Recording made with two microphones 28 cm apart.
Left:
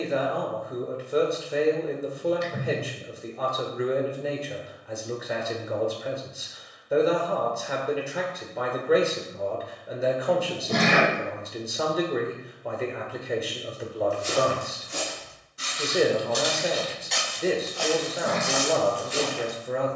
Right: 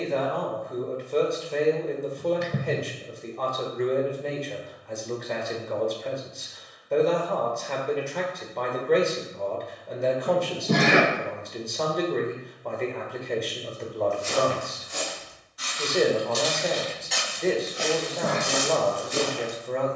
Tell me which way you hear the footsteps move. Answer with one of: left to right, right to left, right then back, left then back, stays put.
left to right.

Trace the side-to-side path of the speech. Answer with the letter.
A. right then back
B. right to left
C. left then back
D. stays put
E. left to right
D.